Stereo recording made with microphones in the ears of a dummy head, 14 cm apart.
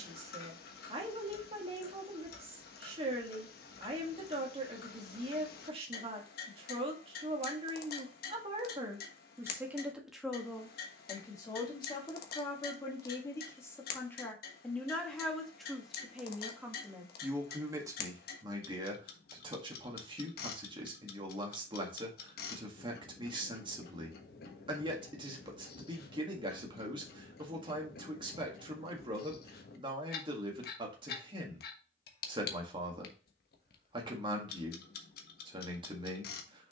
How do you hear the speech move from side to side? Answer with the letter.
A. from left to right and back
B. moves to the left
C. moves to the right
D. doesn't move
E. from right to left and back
E.